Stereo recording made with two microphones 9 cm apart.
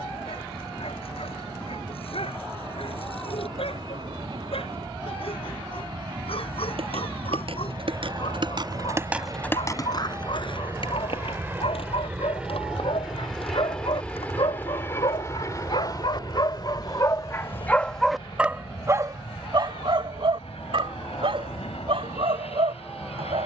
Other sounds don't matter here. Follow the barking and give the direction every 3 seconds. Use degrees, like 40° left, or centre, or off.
80° left, 80° left, 80° left, 70° left, 70° left, 40° left, 40° right, 80° right.